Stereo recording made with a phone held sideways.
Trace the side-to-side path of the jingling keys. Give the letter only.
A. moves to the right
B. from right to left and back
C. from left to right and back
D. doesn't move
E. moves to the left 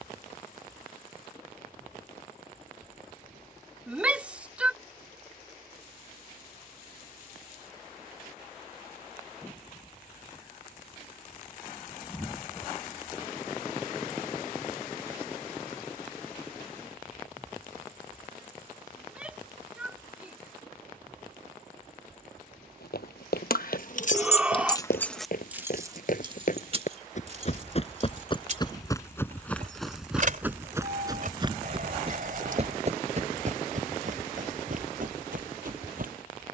A.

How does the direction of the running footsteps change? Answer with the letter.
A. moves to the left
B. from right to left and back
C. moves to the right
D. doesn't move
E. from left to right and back
C.